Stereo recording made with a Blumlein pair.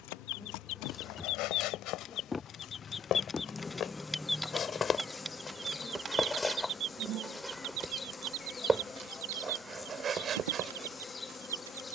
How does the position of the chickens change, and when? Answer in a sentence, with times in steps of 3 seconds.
You can hear the chickens on the left from 0 s, in the centre from 3 s and on the right from 6 s.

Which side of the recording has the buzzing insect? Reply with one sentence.
You can hear the buzzing insect in the centre.